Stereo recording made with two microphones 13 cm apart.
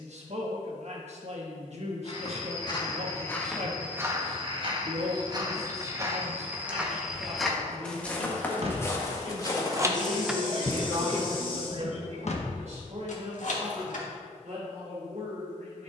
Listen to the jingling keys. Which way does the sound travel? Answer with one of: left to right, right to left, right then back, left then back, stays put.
right to left.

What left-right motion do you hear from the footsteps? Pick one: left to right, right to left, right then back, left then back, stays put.
right then back.